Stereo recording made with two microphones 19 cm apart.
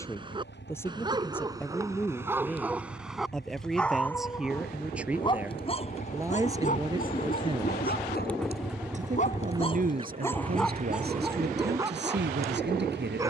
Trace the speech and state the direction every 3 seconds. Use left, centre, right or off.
centre, centre, right, right, right.